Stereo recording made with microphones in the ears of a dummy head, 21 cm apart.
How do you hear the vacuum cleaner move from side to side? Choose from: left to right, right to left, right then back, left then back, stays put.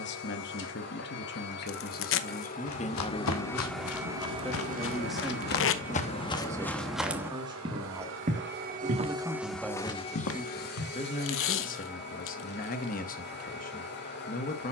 right then back.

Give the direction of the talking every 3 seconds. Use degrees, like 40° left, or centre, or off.
40° left, 10° left, 20° right, 10° left, 40° left.